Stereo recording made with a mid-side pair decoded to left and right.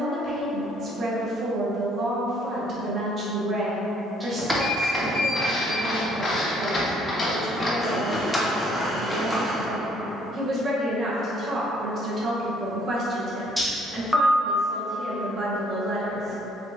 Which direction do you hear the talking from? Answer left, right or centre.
right.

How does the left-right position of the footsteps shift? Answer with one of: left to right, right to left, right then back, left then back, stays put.
left then back.